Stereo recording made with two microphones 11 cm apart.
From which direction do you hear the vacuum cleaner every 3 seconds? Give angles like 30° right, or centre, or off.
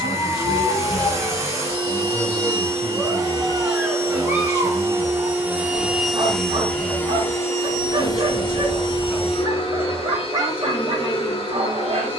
30° right, 20° right, 20° left, 60° left.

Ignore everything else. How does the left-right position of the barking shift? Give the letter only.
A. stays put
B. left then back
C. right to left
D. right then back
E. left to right
E.